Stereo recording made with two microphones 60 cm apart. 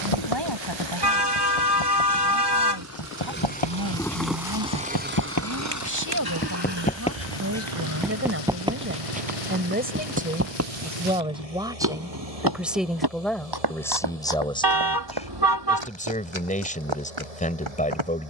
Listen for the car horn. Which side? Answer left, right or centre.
right.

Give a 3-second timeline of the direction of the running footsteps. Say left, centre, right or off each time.
left, left, centre, right, right, right.